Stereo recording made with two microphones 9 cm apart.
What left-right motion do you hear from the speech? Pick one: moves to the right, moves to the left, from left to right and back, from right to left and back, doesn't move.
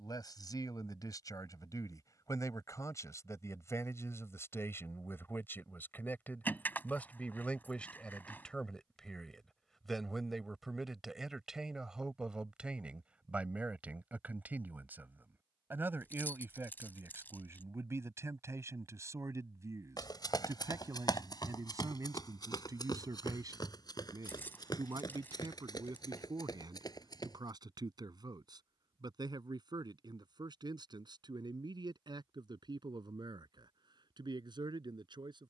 moves to the right.